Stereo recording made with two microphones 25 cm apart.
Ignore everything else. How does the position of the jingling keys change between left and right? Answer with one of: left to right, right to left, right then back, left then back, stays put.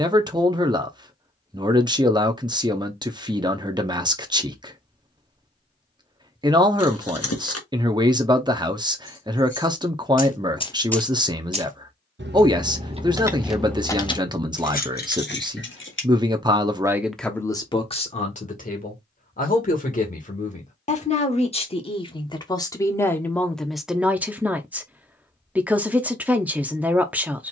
right then back.